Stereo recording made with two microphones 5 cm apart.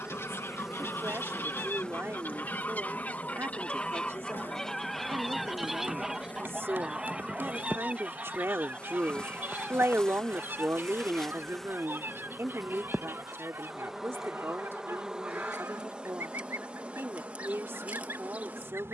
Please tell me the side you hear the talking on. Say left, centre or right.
right.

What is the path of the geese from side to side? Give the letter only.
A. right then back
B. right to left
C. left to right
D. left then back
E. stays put
C.